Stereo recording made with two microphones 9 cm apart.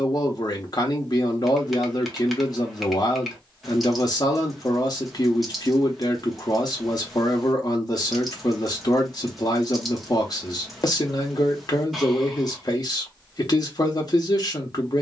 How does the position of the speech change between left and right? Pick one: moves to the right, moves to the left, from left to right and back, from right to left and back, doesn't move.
doesn't move.